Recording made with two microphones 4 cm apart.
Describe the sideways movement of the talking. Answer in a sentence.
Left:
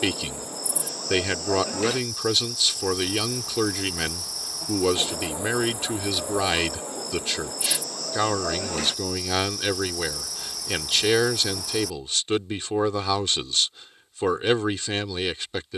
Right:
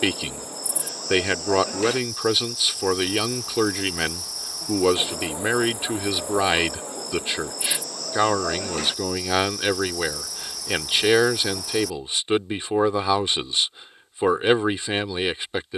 You can hear the talking stay in one place.